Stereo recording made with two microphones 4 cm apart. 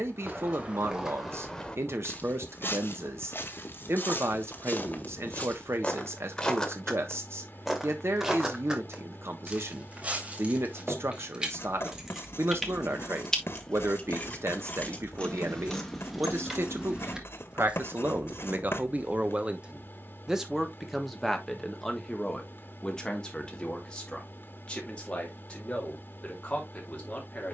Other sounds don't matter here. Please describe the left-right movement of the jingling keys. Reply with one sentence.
You can hear the jingling keys move from right to left and back again.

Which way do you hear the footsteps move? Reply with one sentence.
In this clip you hear the footsteps move from right to left and back again.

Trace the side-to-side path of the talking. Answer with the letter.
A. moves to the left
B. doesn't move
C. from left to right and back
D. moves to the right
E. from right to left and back
A.